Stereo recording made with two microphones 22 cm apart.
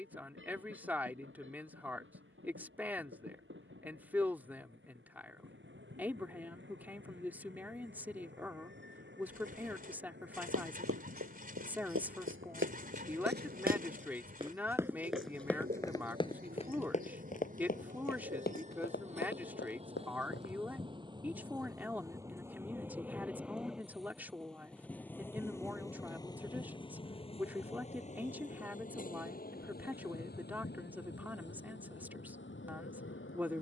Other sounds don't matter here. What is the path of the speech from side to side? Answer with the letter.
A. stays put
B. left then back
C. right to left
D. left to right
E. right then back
A.